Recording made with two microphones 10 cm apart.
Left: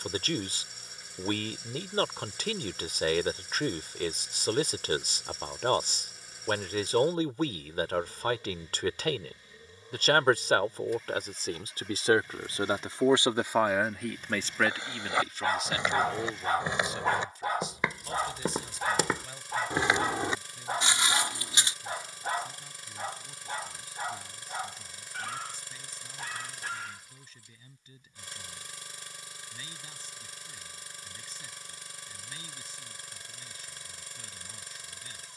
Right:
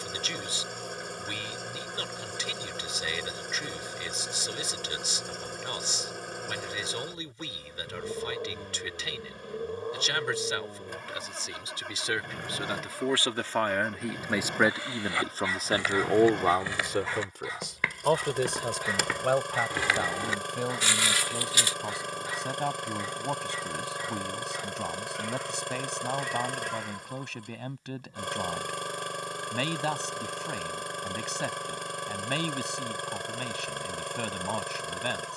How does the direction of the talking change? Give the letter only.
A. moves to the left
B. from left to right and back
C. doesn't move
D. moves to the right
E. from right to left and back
D.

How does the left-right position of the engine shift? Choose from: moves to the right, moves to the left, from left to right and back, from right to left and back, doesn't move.
doesn't move.